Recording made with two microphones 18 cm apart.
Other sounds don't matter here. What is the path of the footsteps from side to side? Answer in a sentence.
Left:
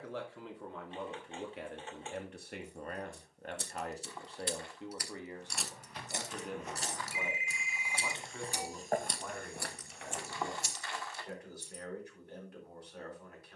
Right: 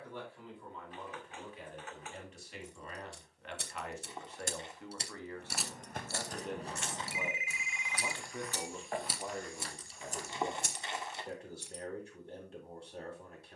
You can hear the footsteps go from the right side to the left.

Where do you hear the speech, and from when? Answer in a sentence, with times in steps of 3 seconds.
In this clip you hear the speech on the left from 0 s, in the centre from 6 s and on the right from 9 s.